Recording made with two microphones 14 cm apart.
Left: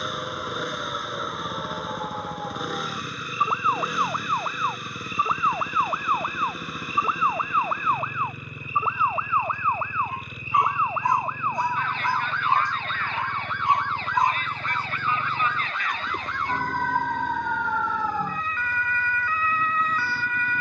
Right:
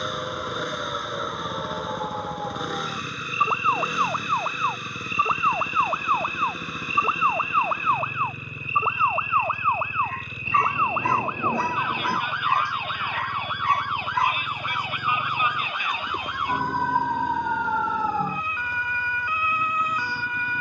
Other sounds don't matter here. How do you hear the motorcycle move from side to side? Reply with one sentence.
You can hear the motorcycle stay in one place.